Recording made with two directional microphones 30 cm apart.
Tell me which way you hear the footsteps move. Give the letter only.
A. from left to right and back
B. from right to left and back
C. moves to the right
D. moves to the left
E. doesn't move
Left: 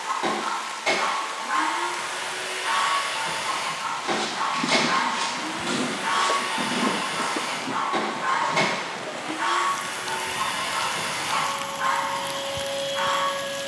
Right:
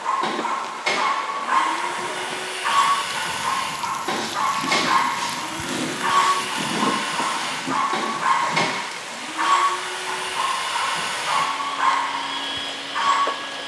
C.